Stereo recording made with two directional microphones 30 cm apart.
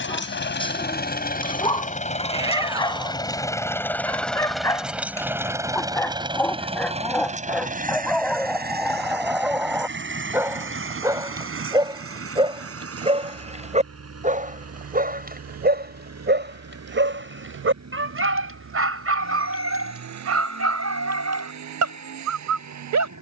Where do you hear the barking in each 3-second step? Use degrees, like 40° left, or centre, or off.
20° left, 10° left, centre, 10° right, 20° right, 40° right, 50° right, 60° right.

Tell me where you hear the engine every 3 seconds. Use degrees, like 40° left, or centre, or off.
30° left, centre, 20° right, 40° right, 50° right, 60° right, 60° right, 70° right.